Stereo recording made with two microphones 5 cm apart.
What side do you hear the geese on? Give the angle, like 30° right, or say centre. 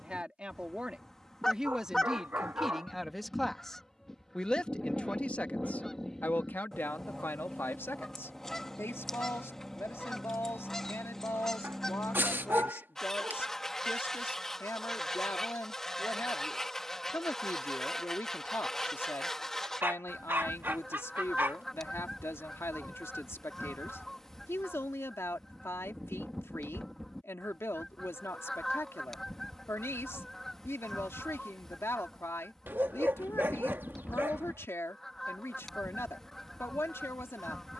10° left.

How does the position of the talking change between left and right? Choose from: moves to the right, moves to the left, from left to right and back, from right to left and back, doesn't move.
moves to the left.